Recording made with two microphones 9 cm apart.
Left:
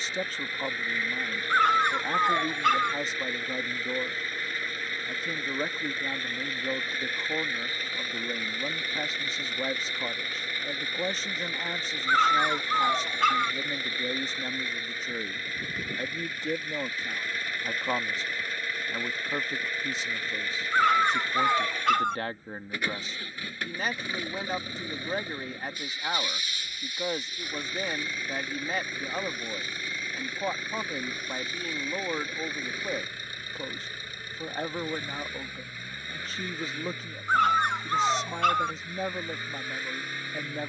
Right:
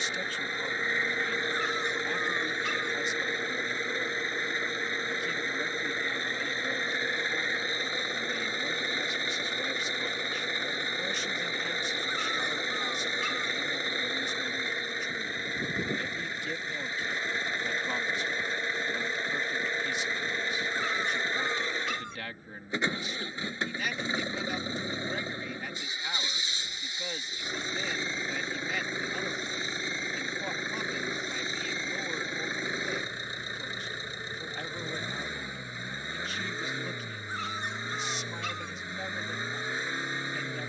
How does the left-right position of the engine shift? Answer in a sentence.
You can hear the engine stay put.